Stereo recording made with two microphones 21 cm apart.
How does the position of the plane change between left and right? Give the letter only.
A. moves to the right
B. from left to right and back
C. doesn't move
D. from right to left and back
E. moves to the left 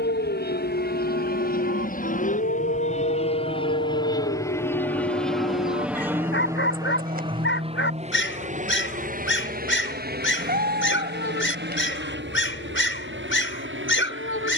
A.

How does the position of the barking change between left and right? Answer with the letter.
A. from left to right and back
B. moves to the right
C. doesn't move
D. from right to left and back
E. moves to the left
C.